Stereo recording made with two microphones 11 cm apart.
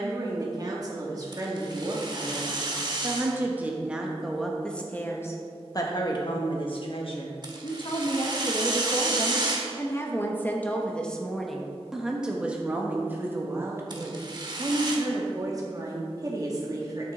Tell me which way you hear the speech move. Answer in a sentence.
In this clip you hear the speech move from right to left and back again.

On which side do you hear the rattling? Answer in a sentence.
You can hear the rattling on the right.